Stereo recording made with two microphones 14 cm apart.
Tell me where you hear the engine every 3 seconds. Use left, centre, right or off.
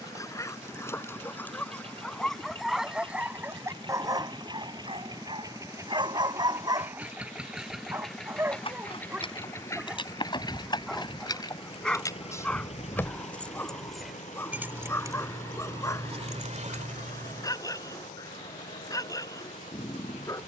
right, right, centre, left, left, left, left.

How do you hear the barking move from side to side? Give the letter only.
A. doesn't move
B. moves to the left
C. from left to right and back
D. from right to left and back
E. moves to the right
C.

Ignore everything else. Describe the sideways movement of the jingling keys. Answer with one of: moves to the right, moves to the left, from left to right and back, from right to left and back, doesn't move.
moves to the right.